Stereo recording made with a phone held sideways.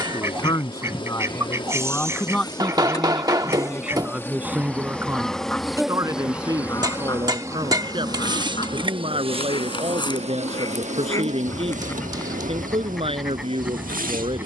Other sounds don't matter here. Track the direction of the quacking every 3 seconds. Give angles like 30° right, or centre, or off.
20° right, centre, 30° left, 30° left, centre.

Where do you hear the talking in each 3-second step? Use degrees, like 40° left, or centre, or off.
20° left, 10° right, 30° right, 40° right, 40° right.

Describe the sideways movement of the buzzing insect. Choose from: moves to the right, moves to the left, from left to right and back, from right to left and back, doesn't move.
moves to the right.